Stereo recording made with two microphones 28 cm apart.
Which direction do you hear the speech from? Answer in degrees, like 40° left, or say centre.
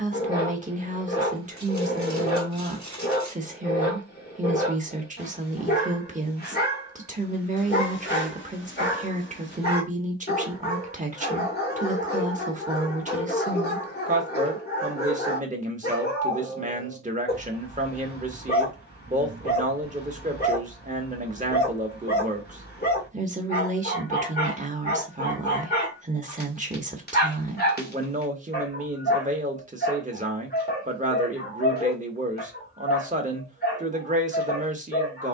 30° right.